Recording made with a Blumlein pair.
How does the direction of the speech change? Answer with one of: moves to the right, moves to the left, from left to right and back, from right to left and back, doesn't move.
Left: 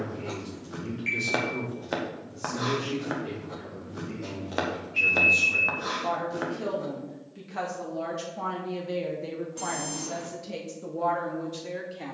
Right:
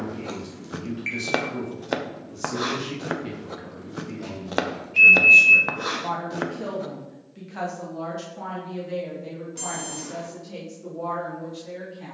moves to the left.